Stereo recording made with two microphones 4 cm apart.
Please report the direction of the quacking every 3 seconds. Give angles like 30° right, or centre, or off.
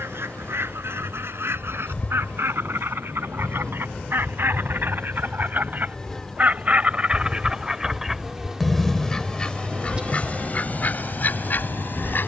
70° right, 60° right, 20° right, 40° left.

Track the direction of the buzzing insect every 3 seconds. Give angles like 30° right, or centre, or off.
30° left, 20° left, centre, 30° right.